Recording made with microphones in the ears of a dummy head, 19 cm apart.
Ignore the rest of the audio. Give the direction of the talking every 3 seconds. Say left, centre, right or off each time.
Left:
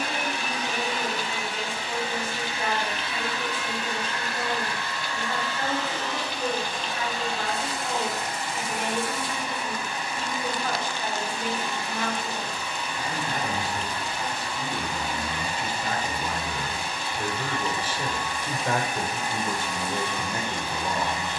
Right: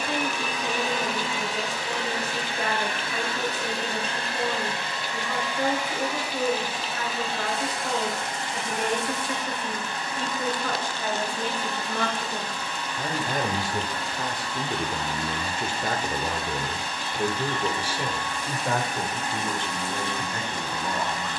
right, right, right, right, right, right, centre.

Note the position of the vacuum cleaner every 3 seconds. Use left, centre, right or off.
right, right, centre, centre, centre, centre, centre.